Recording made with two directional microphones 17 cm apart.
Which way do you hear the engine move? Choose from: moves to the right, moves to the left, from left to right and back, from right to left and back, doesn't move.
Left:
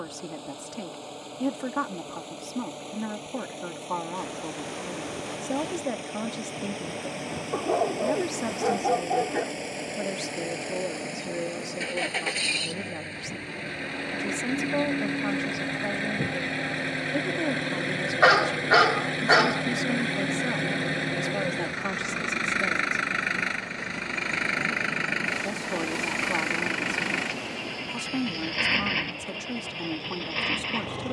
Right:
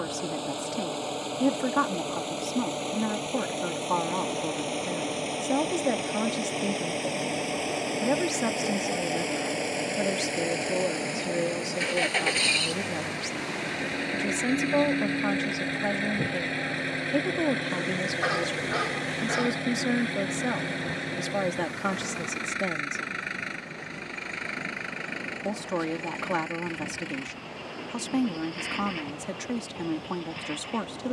moves to the left.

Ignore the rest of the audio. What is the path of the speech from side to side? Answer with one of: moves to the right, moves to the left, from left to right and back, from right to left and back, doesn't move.
doesn't move.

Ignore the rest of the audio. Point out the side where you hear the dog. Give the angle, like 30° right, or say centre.
70° left.